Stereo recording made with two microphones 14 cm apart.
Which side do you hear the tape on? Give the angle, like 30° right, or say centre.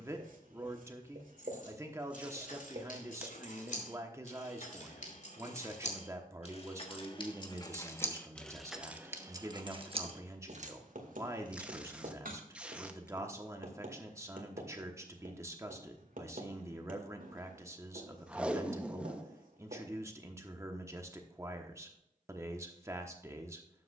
10° right.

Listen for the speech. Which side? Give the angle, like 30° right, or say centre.
20° right.